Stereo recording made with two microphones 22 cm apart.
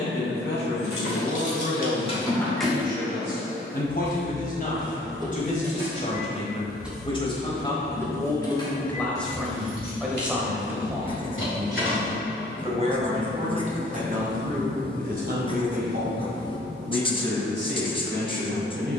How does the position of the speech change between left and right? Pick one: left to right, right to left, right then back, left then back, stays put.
left to right.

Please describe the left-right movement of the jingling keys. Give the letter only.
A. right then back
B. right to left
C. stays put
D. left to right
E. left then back
A.